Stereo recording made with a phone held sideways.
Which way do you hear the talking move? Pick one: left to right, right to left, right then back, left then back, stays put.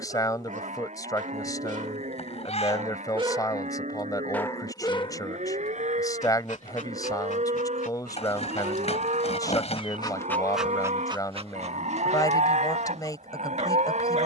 stays put.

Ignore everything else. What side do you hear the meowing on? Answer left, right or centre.
left.